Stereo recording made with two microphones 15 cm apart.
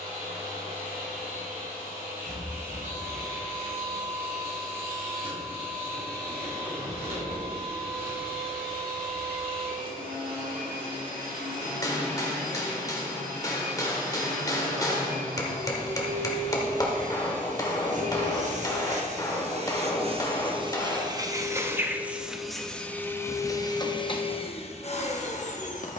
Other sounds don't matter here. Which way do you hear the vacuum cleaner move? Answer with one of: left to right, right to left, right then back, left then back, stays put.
right to left.